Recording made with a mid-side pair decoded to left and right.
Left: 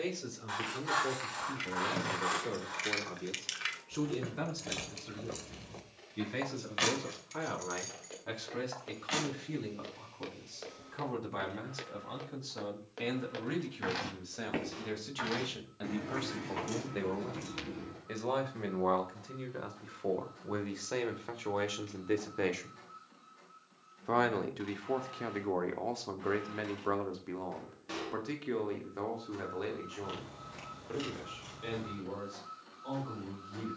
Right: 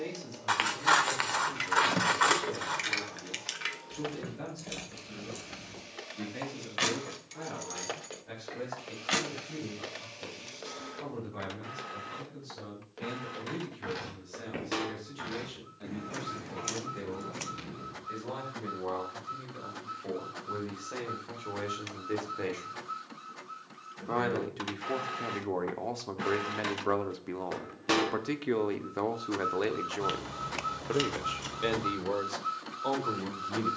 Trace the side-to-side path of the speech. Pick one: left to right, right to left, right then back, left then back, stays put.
left to right.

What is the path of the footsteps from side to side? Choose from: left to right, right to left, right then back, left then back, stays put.
right to left.